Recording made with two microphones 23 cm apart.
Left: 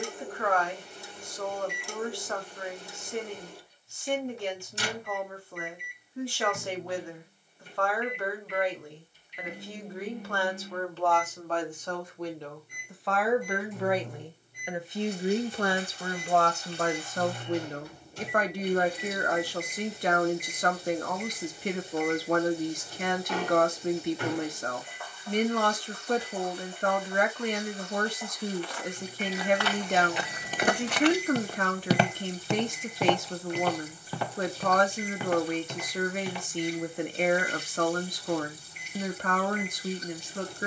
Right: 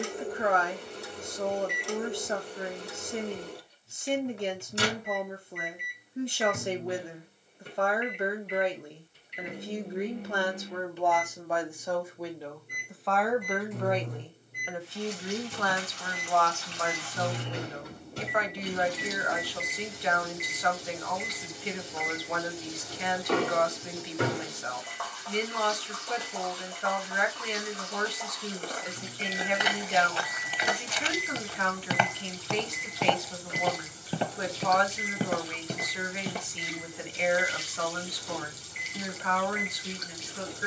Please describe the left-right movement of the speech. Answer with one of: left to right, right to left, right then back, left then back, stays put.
right to left.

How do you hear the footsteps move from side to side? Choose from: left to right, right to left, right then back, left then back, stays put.
left then back.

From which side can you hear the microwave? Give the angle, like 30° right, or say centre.
60° right.